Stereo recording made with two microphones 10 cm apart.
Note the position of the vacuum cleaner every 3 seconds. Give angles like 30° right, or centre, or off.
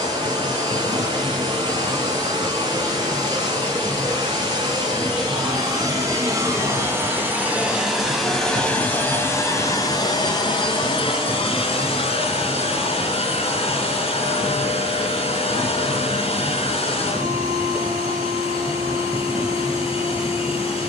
40° right, 40° right, 10° right, 40° left, 60° left, 60° left, 60° left.